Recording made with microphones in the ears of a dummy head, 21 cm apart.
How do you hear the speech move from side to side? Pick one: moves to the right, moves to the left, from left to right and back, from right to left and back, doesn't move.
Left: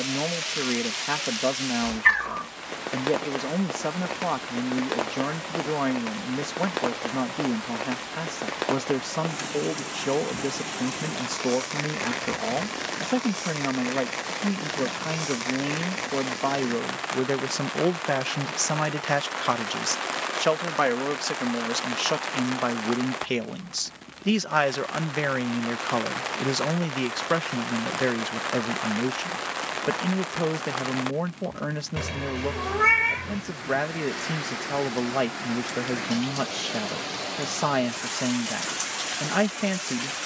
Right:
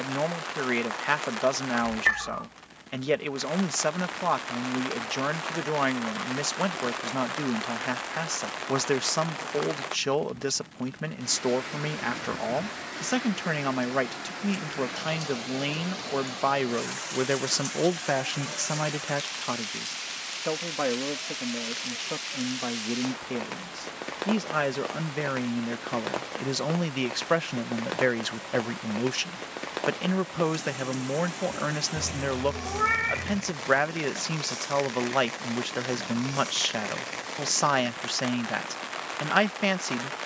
from right to left and back.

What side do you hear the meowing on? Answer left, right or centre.
left.